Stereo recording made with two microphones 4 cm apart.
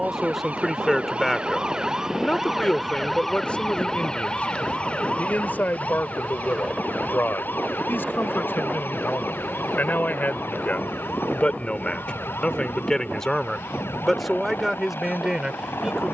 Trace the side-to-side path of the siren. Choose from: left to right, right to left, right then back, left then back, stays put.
right to left.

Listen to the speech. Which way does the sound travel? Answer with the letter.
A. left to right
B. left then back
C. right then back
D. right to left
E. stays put
B.